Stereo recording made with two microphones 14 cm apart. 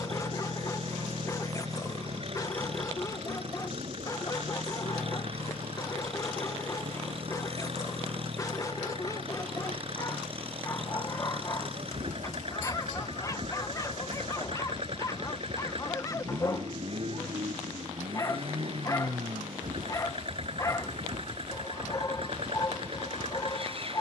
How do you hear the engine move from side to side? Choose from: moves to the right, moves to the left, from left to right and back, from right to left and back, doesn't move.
doesn't move.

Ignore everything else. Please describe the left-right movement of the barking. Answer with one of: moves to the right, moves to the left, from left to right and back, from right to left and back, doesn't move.
doesn't move.